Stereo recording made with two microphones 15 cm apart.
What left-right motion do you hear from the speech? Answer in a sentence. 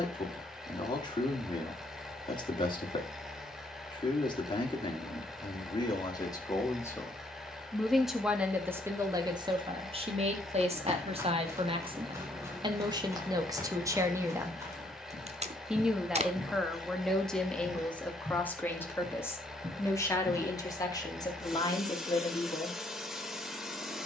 You can hear the speech go right and come back.